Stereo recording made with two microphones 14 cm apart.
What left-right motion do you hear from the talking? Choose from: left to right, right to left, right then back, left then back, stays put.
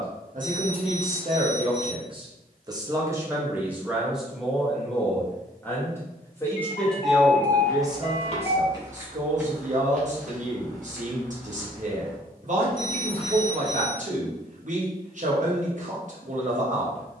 left then back.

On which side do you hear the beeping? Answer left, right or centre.
left.